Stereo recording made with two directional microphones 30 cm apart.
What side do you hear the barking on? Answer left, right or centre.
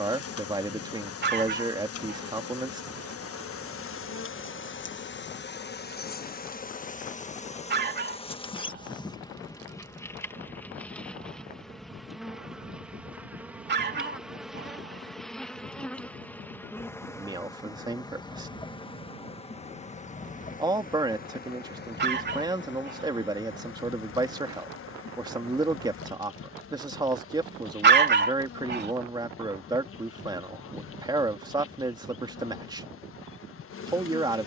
right.